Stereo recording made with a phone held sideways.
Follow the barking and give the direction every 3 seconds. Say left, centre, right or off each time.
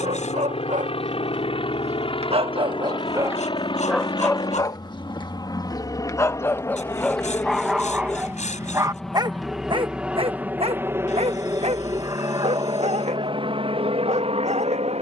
right, centre, centre, right, right.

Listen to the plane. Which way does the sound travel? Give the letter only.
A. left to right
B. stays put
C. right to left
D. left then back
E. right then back
A.